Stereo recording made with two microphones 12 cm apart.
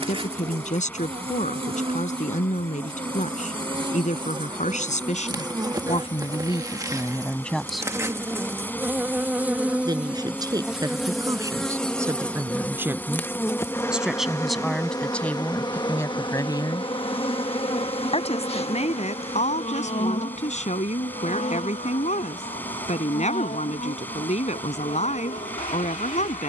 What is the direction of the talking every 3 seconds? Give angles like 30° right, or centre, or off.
70° left, 70° left, 20° left, 30° right, 10° right, 20° left, 70° left, 70° left, 70° left.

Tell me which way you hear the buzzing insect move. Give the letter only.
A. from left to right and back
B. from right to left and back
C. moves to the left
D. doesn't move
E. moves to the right
C.